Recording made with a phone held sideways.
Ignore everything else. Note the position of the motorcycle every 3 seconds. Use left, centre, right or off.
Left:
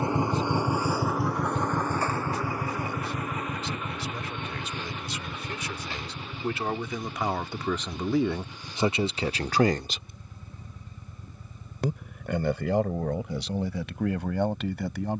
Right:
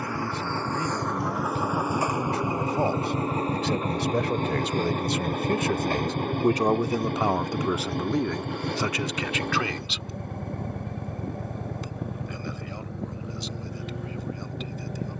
centre, right, right, right, right.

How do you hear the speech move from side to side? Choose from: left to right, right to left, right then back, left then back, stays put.
right to left.